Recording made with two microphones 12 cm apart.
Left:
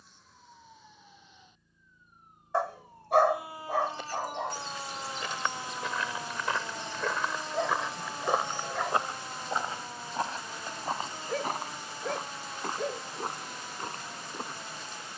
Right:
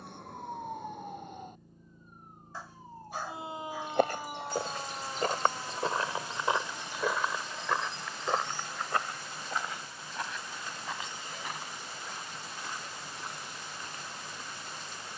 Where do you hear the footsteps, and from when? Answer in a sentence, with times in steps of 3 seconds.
In this clip you hear the footsteps not at all from 0 s, on the right from 3 s, in the centre from 6 s and on the left from 9 s.